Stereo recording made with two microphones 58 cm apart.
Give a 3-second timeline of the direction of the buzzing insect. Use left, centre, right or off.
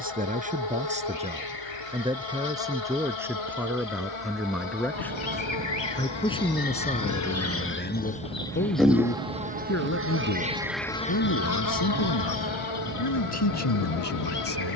left, left, left, centre, left.